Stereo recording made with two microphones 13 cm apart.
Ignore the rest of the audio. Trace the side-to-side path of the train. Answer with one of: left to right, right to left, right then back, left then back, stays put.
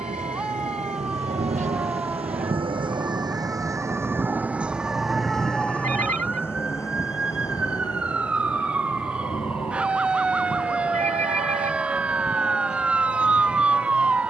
right to left.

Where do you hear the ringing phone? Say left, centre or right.
right.